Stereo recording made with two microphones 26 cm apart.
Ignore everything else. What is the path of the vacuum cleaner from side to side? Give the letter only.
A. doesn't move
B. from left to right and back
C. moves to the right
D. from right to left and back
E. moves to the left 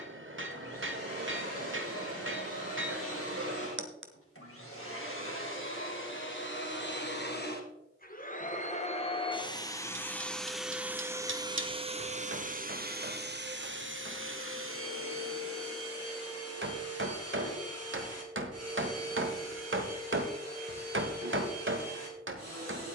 C.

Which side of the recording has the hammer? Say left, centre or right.
right.